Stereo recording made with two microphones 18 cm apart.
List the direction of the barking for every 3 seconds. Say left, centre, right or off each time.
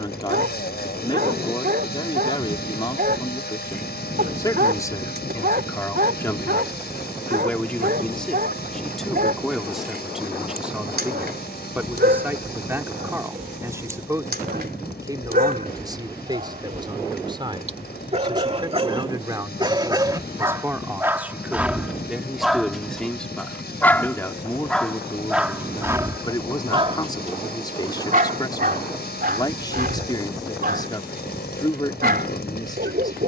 right, right, right, right, right, right, right, centre, centre, right, right.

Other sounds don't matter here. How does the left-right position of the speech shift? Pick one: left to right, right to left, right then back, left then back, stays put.
right then back.